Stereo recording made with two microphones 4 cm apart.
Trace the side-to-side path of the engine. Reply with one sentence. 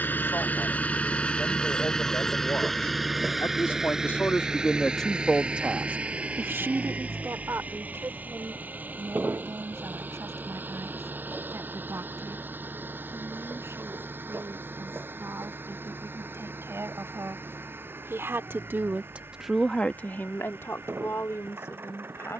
In this clip you hear the engine move to the right.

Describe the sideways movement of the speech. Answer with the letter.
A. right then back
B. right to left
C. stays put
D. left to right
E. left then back
A.